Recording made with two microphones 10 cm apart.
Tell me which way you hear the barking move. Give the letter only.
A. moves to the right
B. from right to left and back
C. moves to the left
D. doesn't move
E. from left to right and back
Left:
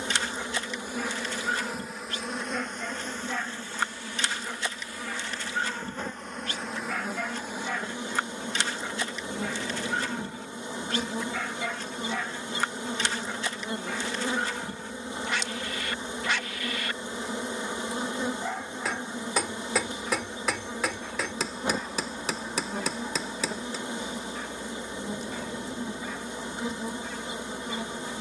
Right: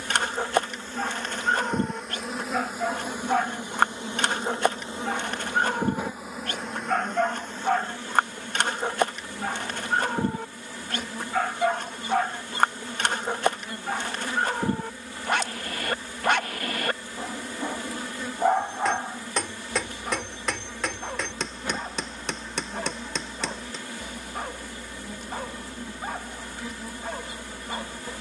D.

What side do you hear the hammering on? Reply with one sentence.
In this clip you hear the hammering in the centre.